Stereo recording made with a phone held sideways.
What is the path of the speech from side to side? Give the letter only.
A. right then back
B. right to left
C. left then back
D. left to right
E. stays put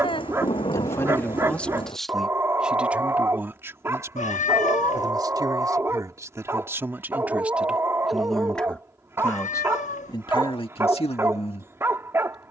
A.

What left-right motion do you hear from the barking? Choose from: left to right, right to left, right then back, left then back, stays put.
stays put.